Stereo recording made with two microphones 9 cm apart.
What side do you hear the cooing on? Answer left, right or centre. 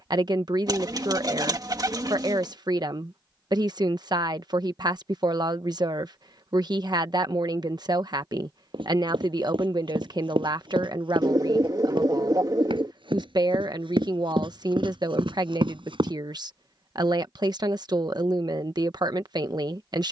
right.